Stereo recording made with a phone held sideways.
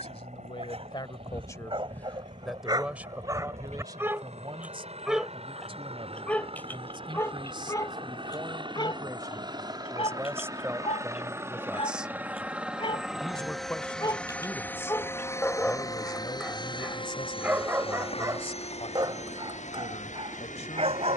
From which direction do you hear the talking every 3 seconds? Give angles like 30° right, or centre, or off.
20° left, 30° right, 30° right, 20° right, 10° left, 30° left, 50° left.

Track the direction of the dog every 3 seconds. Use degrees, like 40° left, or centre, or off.
40° right, 10° right, 20° left, 40° left, 30° left, centre, 30° right.